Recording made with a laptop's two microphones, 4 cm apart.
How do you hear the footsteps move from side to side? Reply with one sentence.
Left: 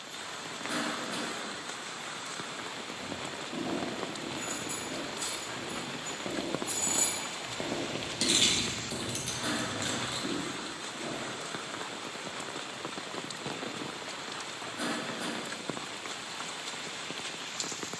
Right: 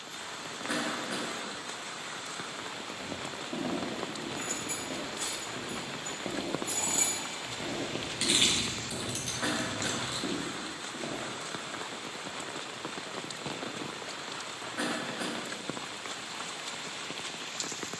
You can hear the footsteps move from right to left and back again.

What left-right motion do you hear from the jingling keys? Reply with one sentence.
You can hear the jingling keys go from the right side to the left.